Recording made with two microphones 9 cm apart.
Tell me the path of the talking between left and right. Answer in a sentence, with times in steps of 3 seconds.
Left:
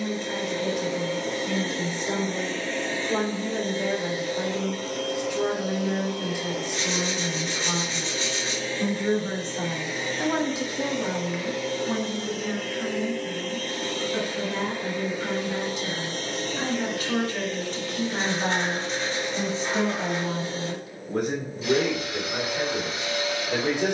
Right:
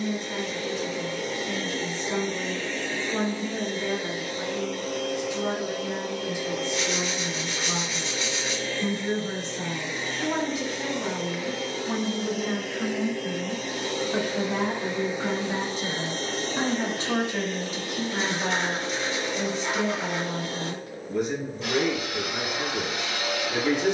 In this clip you hear the talking on the left from 0 s, on the right from 12 s and on the left from 18 s.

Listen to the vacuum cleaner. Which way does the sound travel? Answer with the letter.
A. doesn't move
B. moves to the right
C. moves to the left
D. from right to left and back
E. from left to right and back
B.